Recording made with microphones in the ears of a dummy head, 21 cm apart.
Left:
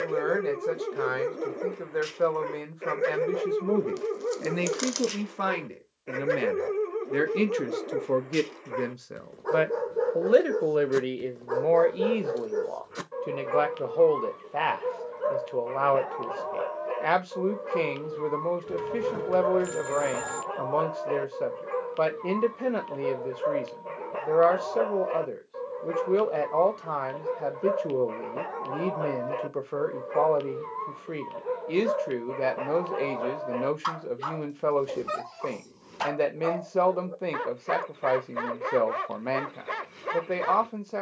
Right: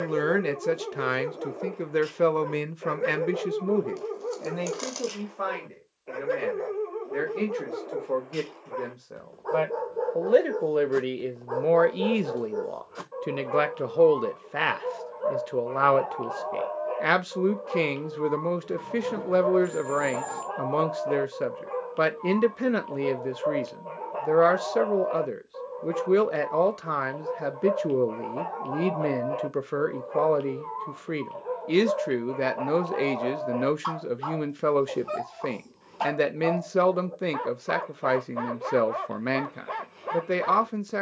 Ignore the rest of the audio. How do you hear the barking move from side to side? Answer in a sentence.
In this clip you hear the barking stay in one place.